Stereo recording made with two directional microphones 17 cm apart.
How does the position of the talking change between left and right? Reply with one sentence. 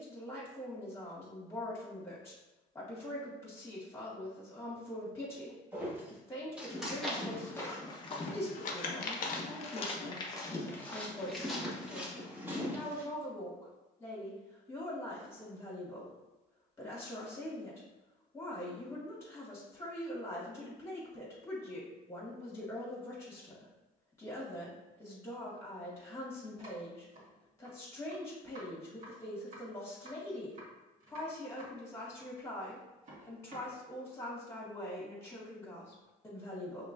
In this clip you hear the talking stay in one place.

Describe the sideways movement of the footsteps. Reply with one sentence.
In this clip you hear the footsteps go left and come back.